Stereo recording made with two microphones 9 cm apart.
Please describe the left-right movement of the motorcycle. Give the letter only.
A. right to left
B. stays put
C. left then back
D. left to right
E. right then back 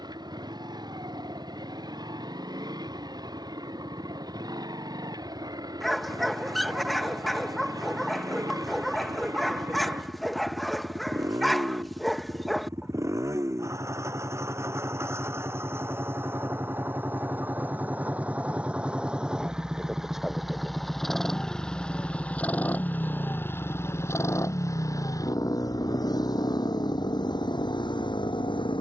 A.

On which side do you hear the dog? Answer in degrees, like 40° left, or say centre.
centre.